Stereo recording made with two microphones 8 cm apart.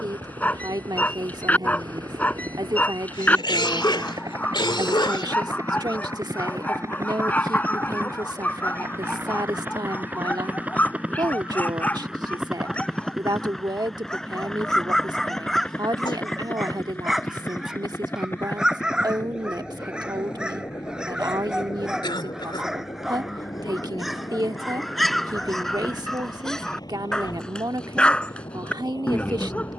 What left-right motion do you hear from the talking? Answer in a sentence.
In this clip you hear the talking stay in one place.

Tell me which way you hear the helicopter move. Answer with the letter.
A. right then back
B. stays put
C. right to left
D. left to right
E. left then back
C.